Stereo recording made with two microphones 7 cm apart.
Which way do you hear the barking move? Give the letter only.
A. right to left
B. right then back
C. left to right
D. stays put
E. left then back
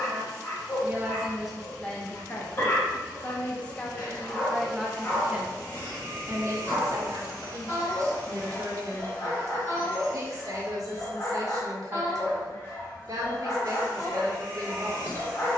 D.